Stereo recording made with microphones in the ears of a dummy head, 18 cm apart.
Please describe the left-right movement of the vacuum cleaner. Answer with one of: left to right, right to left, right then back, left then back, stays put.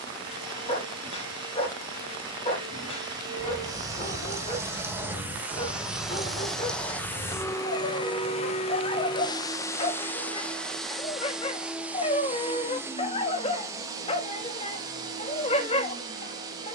left then back.